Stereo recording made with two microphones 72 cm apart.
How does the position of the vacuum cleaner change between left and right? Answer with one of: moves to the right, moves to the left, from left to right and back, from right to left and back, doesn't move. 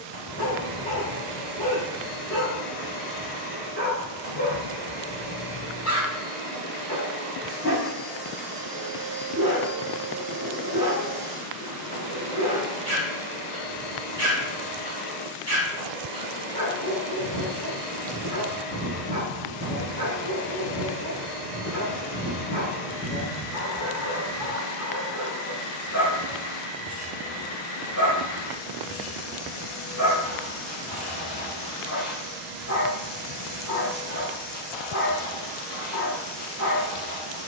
doesn't move.